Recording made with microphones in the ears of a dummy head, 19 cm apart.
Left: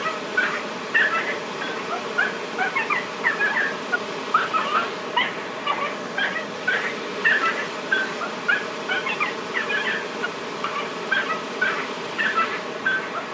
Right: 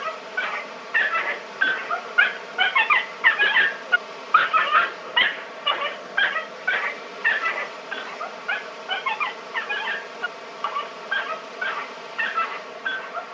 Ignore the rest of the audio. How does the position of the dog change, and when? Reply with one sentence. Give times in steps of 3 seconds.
In this clip you hear the dog in the centre from 0 s, on the right from 3 s, in the centre from 6 s and on the left from 9 s.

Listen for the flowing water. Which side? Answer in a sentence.
In this clip you hear the flowing water on the left.